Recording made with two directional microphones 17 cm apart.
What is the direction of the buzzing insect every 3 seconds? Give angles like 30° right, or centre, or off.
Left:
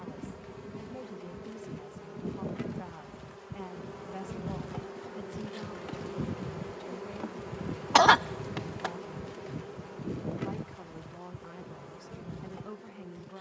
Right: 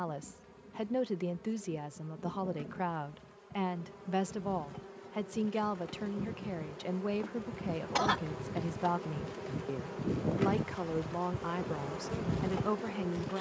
50° left, 40° left, 20° left, 20° right, 50° right.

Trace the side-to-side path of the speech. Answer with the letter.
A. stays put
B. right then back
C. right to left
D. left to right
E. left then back
A.